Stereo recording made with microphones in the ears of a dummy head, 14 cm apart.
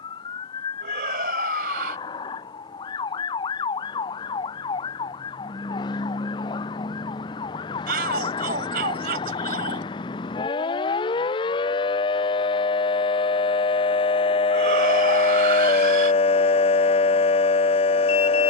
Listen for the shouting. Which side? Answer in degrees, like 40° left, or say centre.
60° right.